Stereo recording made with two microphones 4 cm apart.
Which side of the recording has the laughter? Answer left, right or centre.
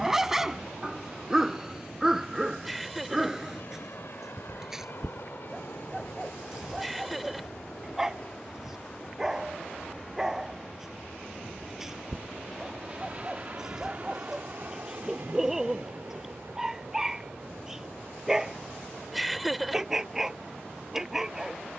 centre.